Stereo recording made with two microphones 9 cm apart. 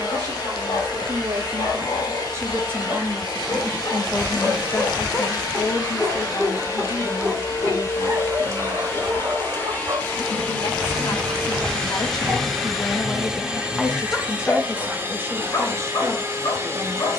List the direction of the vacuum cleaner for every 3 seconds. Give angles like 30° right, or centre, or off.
50° left, 50° left, 40° left, 20° left, 10° right, 30° right.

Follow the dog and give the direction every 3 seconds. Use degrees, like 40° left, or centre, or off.
60° left, 40° left, 20° right, 40° right, centre, 50° left.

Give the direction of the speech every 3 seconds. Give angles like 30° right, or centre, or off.
40° right, 20° left, 70° left, 70° left, 10° left, 30° right.